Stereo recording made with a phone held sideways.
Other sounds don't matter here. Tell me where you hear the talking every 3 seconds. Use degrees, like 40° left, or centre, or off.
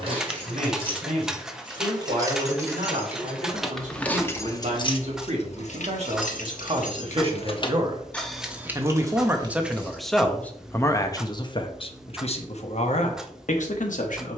60° right, 60° right, 40° right, 10° left, 60° left.